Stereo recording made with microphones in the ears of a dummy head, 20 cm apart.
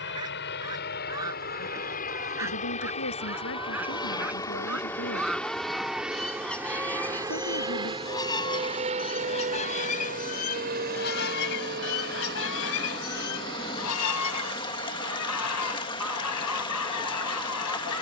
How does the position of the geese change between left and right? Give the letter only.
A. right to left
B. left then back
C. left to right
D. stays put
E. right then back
A.